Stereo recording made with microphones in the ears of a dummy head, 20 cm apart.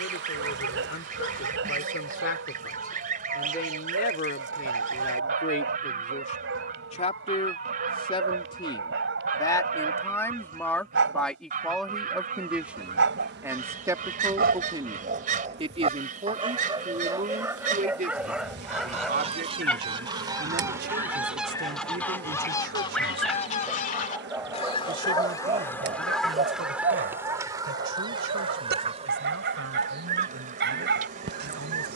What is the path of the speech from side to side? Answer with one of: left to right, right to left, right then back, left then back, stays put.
left to right.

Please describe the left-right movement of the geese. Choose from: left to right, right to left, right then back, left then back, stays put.
left then back.